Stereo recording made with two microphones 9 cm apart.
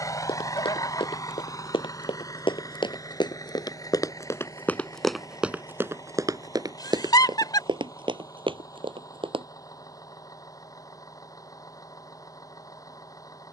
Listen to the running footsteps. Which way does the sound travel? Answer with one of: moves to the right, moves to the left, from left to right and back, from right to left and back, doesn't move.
moves to the right.